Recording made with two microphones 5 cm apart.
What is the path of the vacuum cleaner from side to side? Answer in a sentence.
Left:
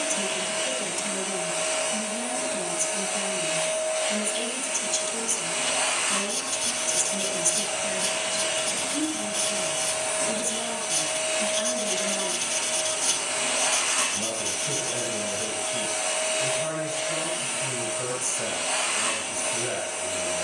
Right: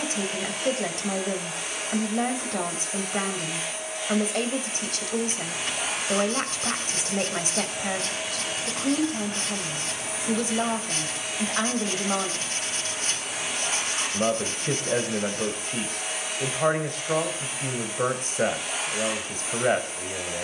You can hear the vacuum cleaner stay in one place.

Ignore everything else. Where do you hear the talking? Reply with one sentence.
In this clip you hear the talking on the right.